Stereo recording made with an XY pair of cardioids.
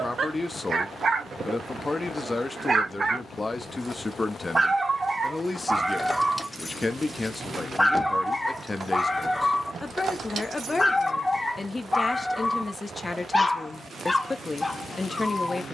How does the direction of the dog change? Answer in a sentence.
In this clip you hear the dog go from the right side to the left.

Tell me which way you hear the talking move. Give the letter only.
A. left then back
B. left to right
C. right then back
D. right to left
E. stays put
E.